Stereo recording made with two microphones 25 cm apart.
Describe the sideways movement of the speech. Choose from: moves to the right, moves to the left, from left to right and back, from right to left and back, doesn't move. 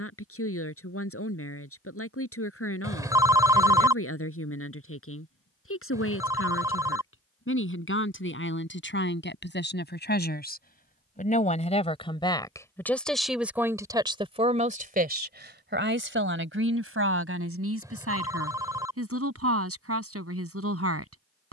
moves to the right.